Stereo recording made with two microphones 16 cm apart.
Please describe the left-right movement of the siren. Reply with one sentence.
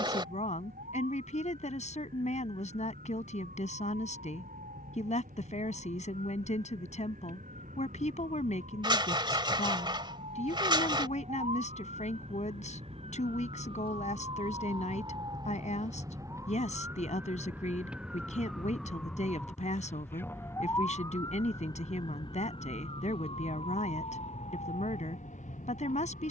You can hear the siren go from the right side to the left.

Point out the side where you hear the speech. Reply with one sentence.
You can hear the speech on the left.